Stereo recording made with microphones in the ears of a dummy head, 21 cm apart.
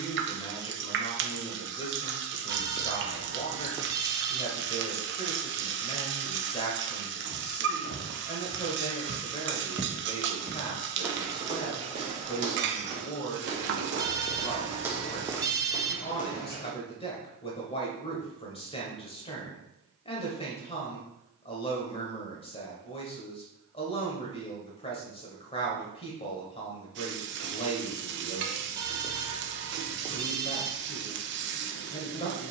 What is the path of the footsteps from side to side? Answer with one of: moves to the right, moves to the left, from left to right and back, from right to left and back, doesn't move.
from left to right and back.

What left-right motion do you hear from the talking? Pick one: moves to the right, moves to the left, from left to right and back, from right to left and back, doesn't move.
doesn't move.